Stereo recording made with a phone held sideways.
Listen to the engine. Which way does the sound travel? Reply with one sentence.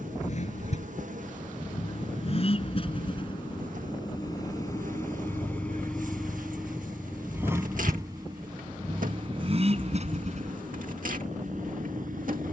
In this clip you hear the engine go from the left side to the right.